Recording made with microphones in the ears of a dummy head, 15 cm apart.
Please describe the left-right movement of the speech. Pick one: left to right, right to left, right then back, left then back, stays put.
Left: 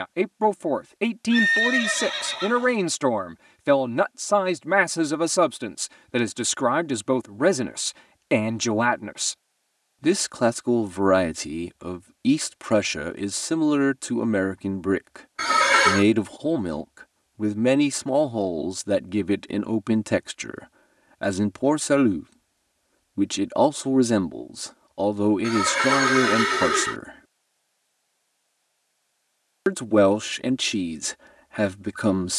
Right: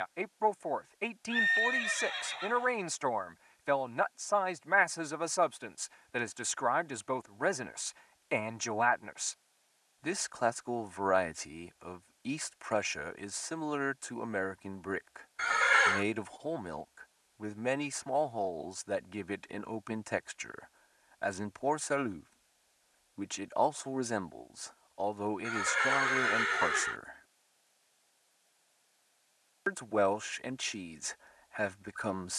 stays put.